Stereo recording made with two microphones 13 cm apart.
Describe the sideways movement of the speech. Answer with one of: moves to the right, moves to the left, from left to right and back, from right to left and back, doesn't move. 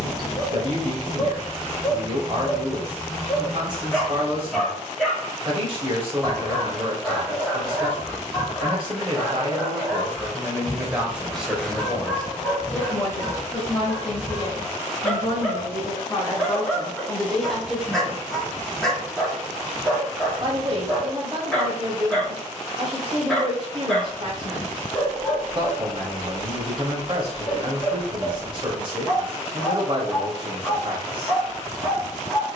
from right to left and back.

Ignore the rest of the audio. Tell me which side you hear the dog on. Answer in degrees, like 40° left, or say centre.
centre.